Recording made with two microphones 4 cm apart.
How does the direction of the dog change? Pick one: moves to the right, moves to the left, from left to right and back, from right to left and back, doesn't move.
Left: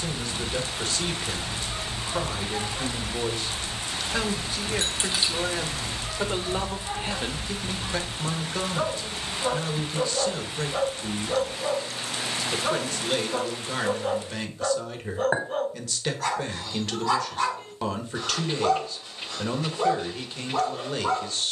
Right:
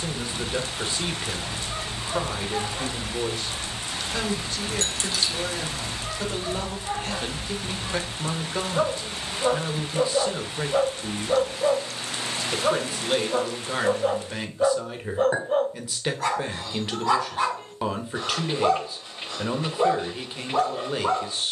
doesn't move.